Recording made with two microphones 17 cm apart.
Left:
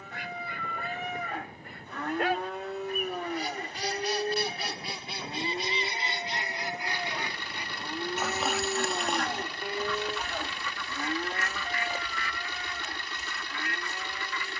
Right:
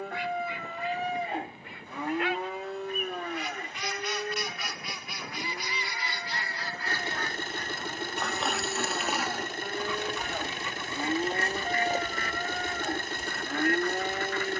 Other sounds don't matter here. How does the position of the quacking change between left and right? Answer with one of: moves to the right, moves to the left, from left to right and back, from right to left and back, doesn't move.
moves to the right.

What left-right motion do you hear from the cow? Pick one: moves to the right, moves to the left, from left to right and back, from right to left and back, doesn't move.
from right to left and back.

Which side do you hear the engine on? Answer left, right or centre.
right.